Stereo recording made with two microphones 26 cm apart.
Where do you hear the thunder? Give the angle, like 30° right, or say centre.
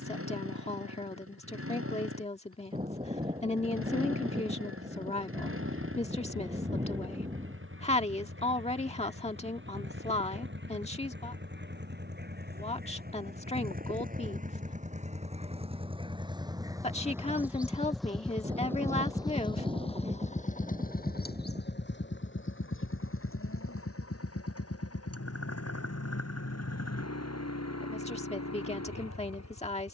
20° right.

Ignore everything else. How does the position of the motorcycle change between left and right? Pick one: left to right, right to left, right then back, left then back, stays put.
right to left.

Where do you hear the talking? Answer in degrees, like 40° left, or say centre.
30° left.